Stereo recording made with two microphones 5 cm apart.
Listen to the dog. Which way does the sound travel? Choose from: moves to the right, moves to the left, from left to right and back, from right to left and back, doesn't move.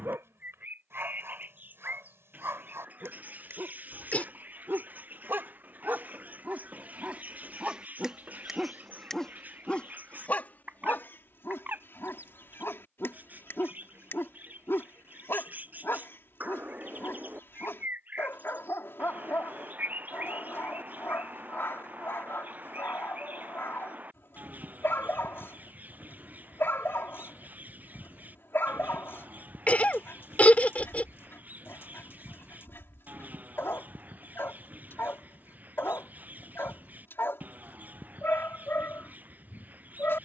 moves to the left.